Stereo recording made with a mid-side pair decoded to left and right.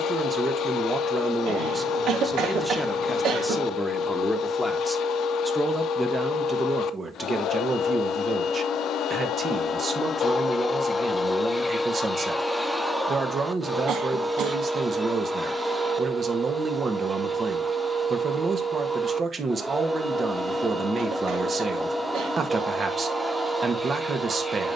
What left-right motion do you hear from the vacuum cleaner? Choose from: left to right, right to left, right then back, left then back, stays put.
left to right.